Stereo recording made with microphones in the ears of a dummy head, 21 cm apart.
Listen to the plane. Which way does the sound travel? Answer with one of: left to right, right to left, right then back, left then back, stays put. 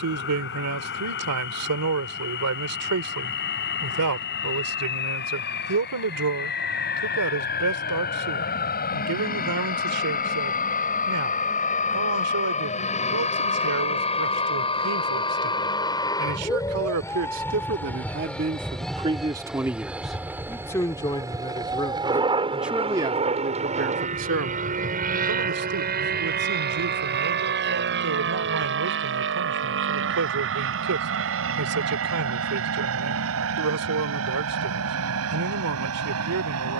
left to right.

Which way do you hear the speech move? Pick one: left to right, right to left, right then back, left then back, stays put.
left then back.